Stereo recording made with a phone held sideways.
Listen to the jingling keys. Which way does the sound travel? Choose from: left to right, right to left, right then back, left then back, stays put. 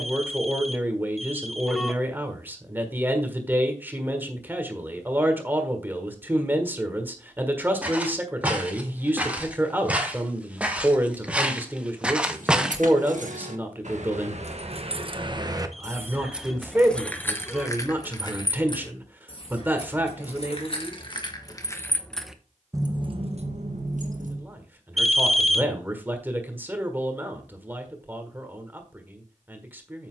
left then back.